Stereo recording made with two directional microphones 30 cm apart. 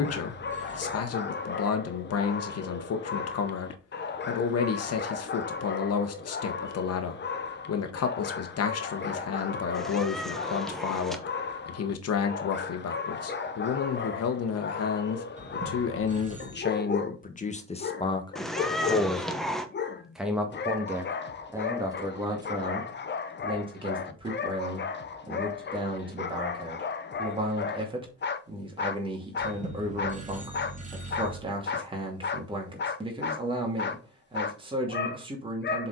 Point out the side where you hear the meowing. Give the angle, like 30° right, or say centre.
centre.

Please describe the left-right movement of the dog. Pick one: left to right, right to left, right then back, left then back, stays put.
stays put.